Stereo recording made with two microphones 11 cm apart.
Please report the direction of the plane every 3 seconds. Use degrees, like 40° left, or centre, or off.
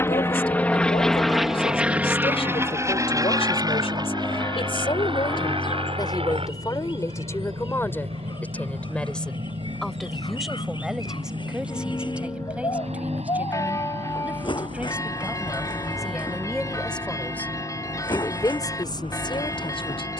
centre, 50° right, 70° right, 70° right, 80° right, 80° right, 80° right.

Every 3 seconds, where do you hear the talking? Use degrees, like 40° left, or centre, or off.
70° left, 70° left, 30° left, centre, 10° right, centre, 50° left.